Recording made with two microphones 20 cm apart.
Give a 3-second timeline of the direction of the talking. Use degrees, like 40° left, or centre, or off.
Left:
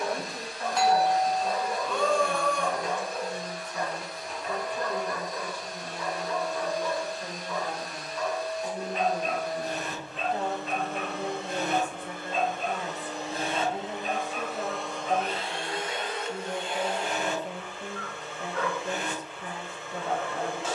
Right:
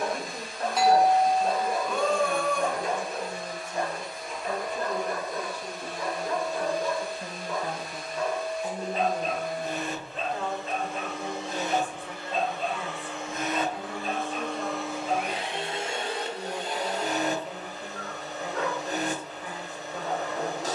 50° right, 40° right, 20° right, 30° left, 40° left, 40° left, 40° left.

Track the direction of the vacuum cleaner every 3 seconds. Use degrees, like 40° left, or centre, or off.
70° left, 70° left, 70° left, 60° left, 30° left, 30° right, 40° right.